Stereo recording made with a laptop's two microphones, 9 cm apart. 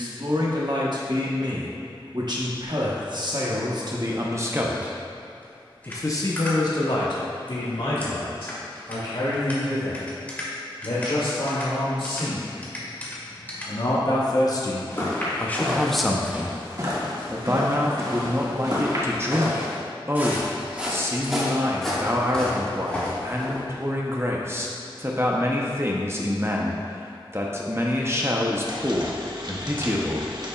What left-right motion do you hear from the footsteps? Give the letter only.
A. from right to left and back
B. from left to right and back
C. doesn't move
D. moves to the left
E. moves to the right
B.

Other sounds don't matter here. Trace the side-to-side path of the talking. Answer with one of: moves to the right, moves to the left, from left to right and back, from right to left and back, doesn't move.
from right to left and back.